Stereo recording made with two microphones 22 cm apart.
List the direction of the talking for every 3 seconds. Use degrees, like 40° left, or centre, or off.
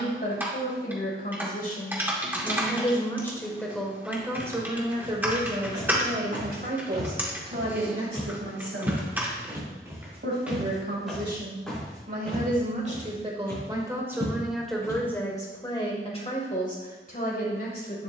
40° left, 10° right, 50° right, 50° right, 20° right, 30° left.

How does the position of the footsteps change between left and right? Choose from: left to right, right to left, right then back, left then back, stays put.
right to left.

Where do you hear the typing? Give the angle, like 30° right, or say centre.
10° right.